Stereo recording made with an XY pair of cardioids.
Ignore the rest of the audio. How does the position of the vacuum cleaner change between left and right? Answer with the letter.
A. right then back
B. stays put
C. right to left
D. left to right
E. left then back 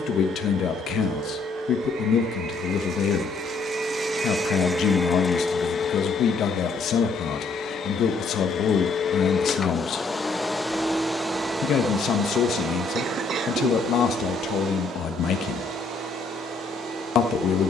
E.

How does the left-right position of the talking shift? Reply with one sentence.
You can hear the talking stay in one place.